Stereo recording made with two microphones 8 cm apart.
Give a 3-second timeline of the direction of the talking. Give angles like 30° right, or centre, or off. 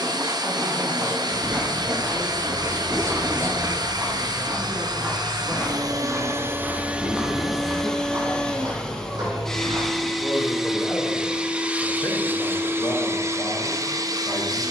50° right, 40° right, 20° right, 20° left, 50° left.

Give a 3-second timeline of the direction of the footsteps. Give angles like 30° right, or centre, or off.
70° right, 20° right, 30° right, 70° right, off.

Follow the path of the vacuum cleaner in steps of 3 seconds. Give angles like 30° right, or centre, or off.
60° right, 60° right, 10° right, centre, 40° right.